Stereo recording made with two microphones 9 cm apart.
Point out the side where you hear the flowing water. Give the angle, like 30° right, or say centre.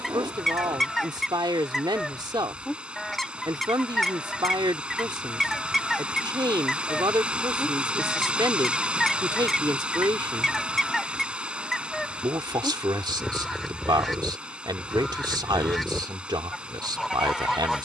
10° right.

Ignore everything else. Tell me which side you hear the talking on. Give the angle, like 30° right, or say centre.
50° right.